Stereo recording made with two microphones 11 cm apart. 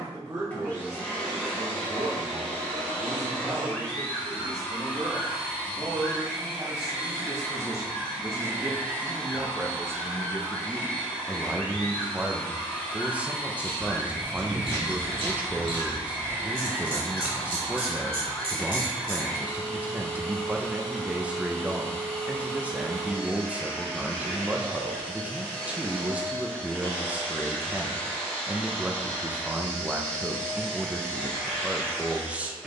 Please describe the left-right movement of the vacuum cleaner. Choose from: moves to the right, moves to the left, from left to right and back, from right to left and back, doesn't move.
doesn't move.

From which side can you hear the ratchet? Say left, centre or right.
right.